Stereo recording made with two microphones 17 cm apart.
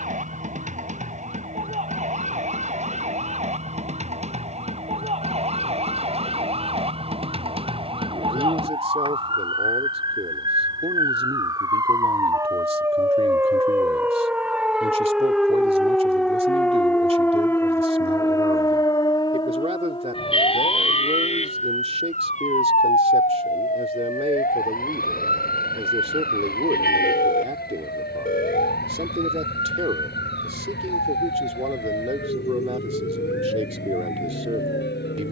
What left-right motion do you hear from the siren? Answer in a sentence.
In this clip you hear the siren move to the left.